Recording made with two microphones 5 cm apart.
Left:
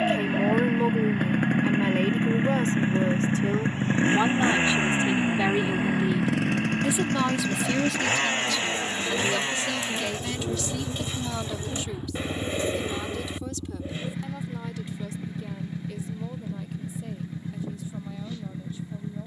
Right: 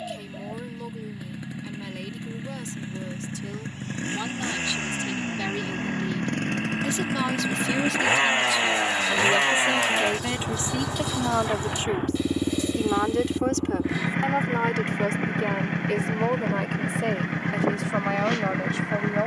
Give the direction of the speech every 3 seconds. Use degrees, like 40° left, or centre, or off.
40° left, 30° left, centre, 30° right, 60° right, 70° right, 80° right.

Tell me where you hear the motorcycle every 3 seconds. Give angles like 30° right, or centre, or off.
50° left, 20° left, 10° right, 40° right, 50° right, 60° right, 70° right.